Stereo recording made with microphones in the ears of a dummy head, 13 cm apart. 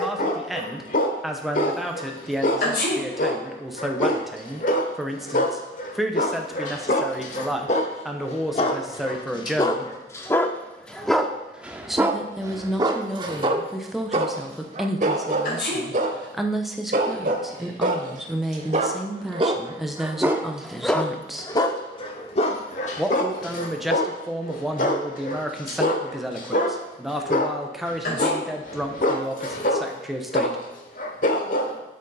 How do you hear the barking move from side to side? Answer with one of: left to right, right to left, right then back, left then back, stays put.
right then back.